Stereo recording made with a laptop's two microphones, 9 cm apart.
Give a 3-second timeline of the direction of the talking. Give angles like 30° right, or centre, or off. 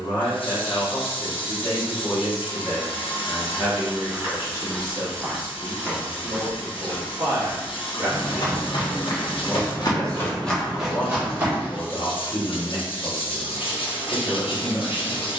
40° left, 30° right, 40° right, 20° left, 30° left.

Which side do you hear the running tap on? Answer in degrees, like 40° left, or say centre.
80° left.